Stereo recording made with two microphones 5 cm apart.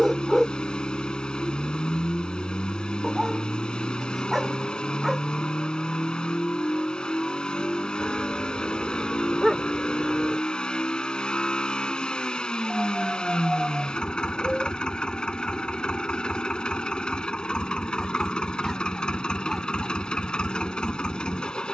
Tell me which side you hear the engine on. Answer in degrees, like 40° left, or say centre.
20° left.